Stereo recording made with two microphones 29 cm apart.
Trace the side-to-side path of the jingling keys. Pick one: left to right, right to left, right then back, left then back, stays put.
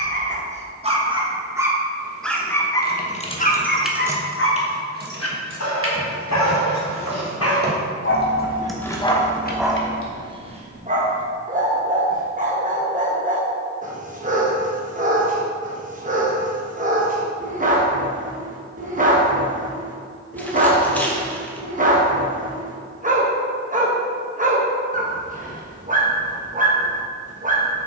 right then back.